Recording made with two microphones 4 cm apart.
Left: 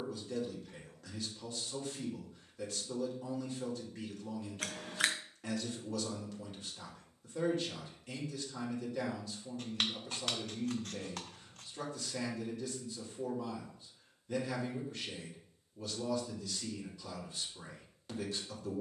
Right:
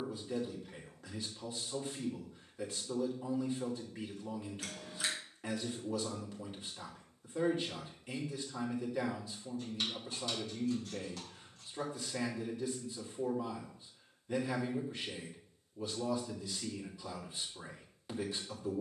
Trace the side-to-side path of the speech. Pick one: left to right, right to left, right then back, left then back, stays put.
stays put.